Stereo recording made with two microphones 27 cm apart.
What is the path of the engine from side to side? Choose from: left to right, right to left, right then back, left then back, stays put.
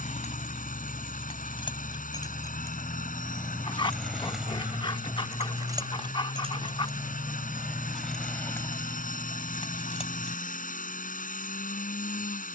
stays put.